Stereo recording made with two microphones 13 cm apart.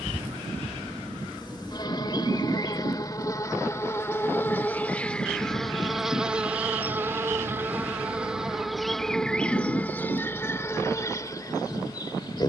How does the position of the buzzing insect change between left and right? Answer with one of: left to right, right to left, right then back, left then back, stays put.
right then back.